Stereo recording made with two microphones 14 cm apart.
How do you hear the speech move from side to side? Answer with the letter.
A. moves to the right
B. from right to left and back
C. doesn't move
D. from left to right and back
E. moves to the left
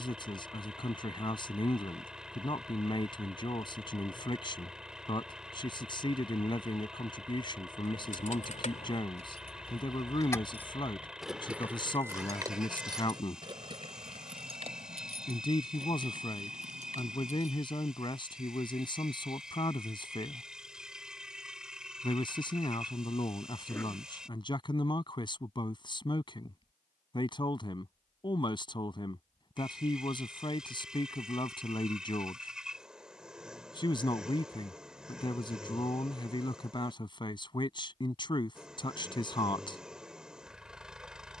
C.